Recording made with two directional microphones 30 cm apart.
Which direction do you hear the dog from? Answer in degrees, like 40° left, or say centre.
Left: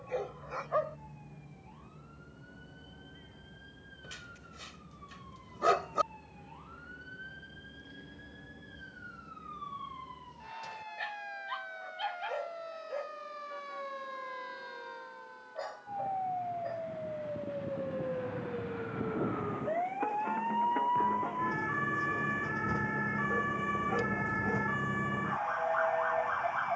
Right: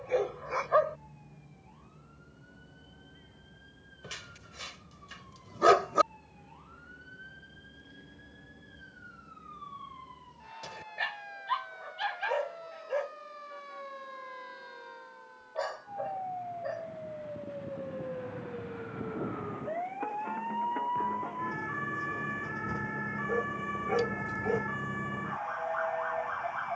40° right.